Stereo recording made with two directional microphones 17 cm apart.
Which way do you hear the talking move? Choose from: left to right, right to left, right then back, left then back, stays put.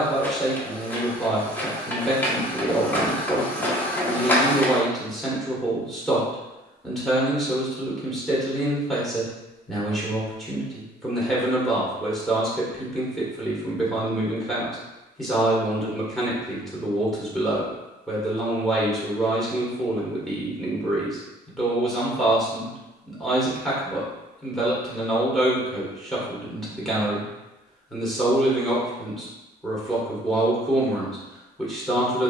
stays put.